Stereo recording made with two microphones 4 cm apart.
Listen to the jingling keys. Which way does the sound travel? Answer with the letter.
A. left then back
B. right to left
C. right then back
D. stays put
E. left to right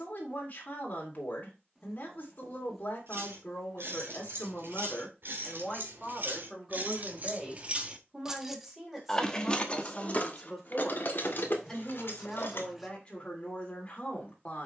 B.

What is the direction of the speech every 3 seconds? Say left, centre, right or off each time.
left, left, centre, centre, left.